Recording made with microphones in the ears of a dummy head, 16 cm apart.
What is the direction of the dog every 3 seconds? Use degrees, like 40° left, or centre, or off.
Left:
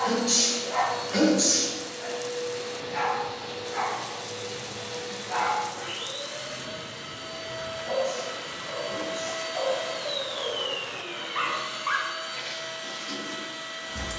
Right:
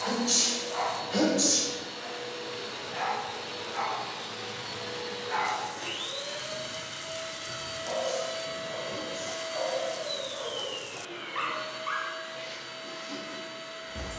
60° left, 10° right, 30° right, 10° right, 60° left.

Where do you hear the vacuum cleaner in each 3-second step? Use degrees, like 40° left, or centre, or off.
70° right, 60° right, 40° right, 30° left, 60° left.